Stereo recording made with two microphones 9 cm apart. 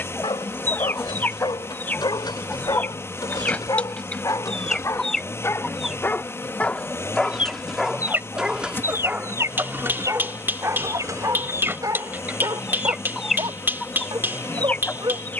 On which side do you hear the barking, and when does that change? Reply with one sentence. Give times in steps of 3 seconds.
In this clip you hear the barking on the left from 0 s, in the centre from 6 s and on the right from 9 s.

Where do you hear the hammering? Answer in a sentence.
In this clip you hear the hammering on the right.